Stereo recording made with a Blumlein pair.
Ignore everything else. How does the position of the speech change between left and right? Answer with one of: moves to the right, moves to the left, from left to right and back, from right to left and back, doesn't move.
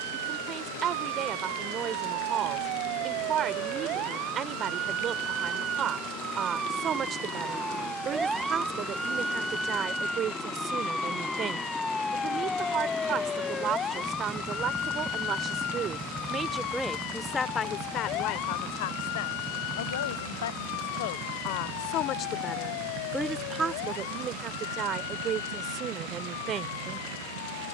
from right to left and back.